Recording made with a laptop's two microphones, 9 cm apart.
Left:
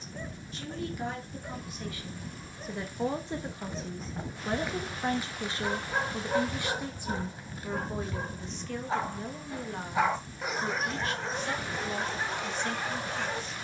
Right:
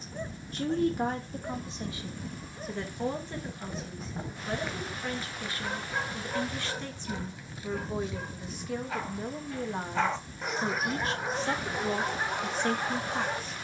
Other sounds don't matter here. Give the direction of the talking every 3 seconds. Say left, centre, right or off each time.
right, left, centre, right, right.